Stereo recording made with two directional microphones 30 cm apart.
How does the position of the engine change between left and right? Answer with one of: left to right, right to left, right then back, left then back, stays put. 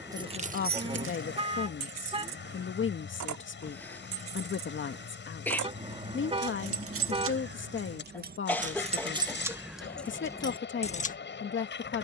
stays put.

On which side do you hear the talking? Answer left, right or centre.
left.